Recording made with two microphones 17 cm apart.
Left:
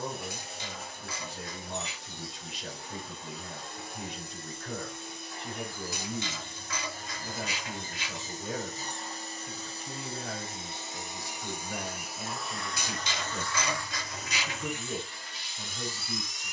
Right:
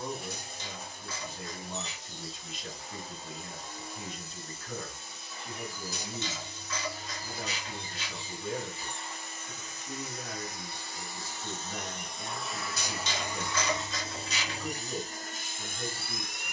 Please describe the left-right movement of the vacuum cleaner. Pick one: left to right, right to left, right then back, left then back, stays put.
left to right.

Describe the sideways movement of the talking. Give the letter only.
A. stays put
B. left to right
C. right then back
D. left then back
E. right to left
A.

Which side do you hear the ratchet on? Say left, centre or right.
left.